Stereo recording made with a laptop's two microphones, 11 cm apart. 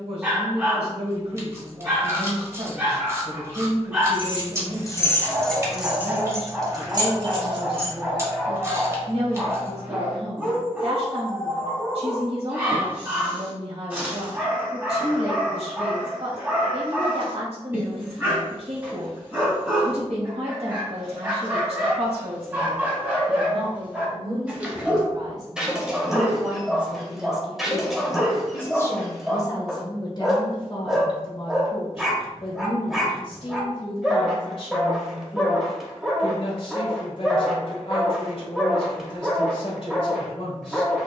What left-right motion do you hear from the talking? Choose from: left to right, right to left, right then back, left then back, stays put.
right to left.